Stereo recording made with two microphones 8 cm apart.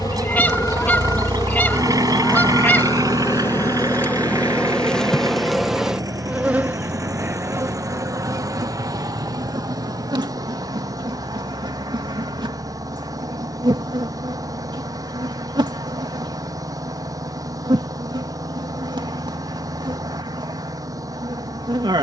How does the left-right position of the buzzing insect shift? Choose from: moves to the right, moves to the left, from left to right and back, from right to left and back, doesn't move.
moves to the right.